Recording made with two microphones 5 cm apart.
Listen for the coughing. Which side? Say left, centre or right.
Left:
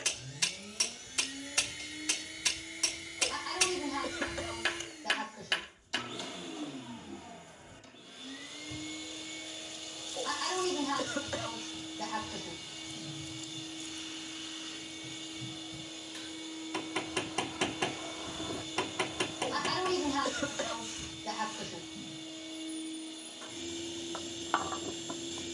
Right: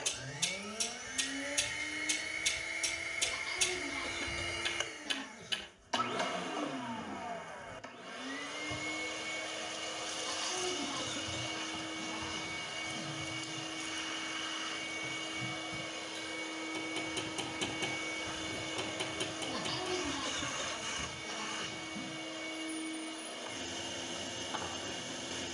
left.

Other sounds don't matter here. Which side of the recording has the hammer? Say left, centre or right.
left.